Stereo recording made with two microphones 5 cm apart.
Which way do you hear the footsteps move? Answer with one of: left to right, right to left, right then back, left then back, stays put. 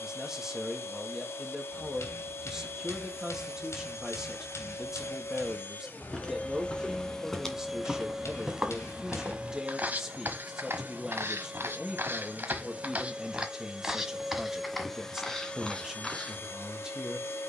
right then back.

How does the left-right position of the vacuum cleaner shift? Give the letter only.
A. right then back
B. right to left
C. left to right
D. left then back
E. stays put
A.